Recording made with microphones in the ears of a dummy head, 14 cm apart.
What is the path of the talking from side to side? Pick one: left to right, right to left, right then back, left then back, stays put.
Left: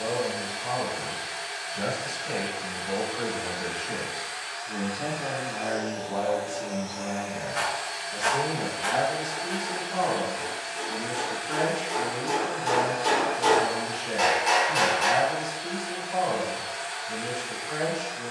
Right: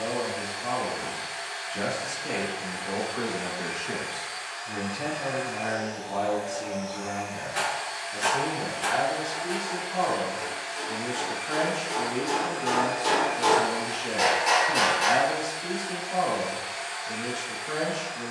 left then back.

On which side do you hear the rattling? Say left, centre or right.
right.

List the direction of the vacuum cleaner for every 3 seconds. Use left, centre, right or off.
left, left, left, left, centre, centre.